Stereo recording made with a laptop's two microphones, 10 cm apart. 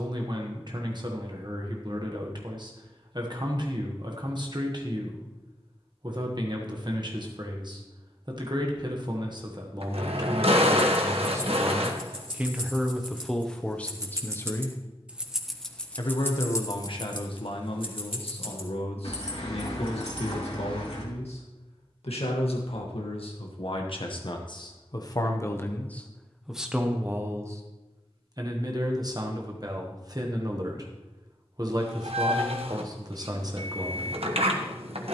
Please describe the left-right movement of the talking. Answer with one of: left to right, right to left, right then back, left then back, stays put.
left then back.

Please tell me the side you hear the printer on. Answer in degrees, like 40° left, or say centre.
70° right.